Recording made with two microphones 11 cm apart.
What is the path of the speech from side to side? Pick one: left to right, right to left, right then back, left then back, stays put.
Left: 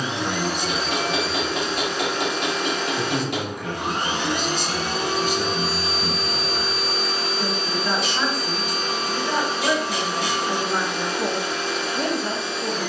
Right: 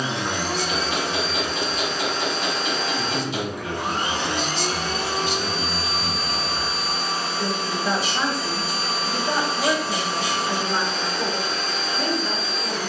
right then back.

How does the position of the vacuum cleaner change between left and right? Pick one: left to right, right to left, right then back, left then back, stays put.
stays put.